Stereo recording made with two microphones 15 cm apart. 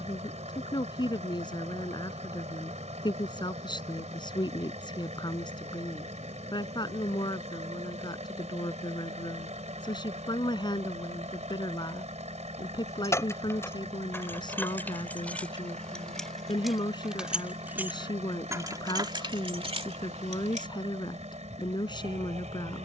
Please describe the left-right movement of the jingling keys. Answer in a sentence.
You can hear the jingling keys move to the right.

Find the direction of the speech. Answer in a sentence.
You can hear the speech on the left.